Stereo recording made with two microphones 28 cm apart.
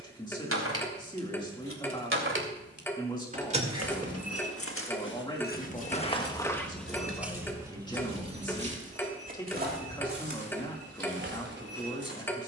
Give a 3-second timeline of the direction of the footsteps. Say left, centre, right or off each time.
off, left, centre, right.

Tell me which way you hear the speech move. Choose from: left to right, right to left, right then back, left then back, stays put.
stays put.